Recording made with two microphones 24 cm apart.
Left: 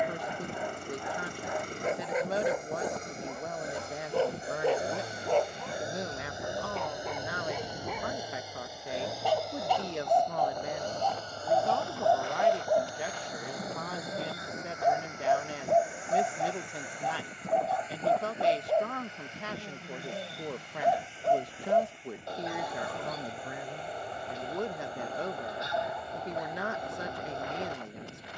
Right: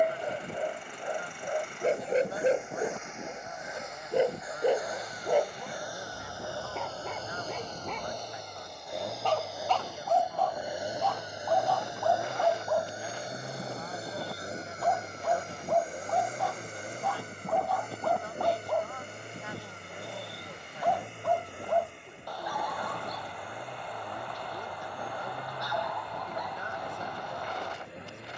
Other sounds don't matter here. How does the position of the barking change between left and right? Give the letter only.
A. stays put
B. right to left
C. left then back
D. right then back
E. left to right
B.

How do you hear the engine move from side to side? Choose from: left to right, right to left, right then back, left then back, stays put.
left to right.